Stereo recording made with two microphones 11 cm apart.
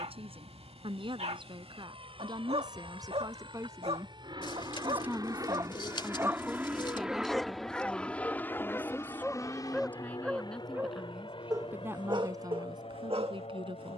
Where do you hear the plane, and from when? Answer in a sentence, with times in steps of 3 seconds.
You can hear the plane on the right from 0 s, in the centre from 6 s and on the left from 9 s.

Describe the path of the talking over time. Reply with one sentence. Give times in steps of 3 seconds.
You can hear the talking on the right from 0 s, in the centre from 6 s and on the right from 12 s.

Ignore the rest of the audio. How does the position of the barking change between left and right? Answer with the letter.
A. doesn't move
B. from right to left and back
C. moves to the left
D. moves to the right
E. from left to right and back
B.